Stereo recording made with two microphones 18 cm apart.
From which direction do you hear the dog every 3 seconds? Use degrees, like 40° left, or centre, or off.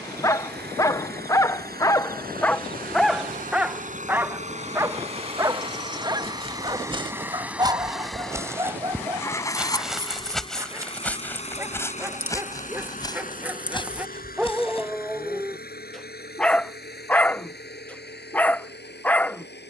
10° left, 10° right, 20° right, 20° right, 10° right, centre, 10° left.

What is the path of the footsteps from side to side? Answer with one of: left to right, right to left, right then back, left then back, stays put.
right to left.